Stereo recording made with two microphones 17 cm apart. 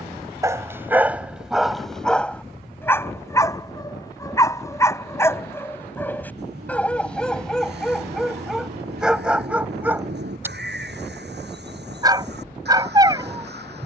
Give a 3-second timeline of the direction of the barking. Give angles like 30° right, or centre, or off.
centre, 20° left, centre, 10° right, 20° right.